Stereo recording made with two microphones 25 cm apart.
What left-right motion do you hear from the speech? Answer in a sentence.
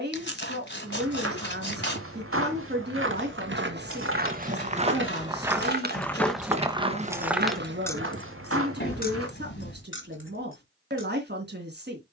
You can hear the speech stay in one place.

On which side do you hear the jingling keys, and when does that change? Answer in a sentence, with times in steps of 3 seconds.
You can hear the jingling keys not at all from 0 s, on the right from 3 s, in the centre from 6 s and on the left from 9 s.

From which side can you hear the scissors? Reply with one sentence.
In this clip you hear the scissors on the left.